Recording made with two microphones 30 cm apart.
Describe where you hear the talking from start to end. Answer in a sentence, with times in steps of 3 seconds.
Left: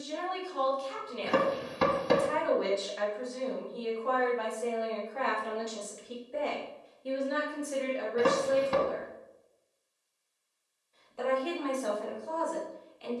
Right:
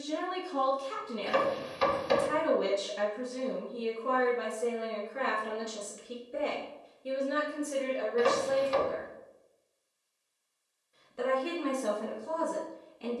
In this clip you hear the talking on the right from 0 s, in the centre from 6 s and on the right from 9 s.